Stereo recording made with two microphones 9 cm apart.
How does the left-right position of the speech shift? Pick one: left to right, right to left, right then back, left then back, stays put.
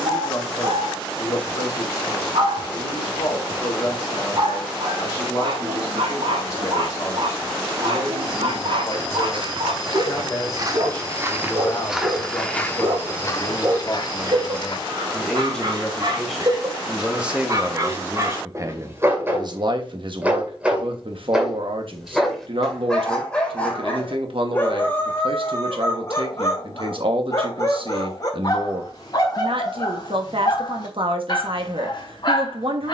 left to right.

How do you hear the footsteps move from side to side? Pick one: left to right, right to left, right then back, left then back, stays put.
right to left.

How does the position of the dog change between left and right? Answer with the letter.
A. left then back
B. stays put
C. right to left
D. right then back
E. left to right
C.